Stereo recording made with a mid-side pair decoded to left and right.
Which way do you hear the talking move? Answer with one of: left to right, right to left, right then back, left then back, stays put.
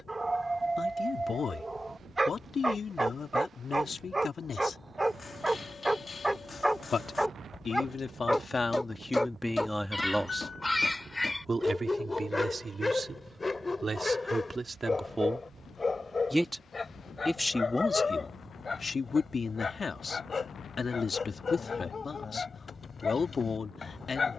right then back.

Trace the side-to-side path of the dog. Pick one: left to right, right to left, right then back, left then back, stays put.
right to left.